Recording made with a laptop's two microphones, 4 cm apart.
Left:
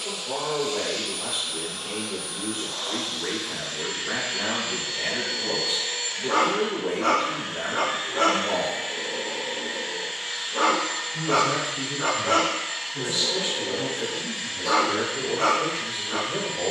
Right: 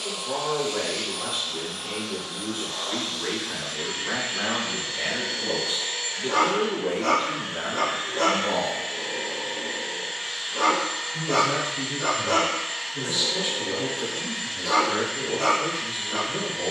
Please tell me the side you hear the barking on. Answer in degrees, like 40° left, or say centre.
40° left.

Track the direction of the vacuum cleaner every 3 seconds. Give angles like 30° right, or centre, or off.
50° right, 20° right, centre, 10° right, 50° right, 50° right.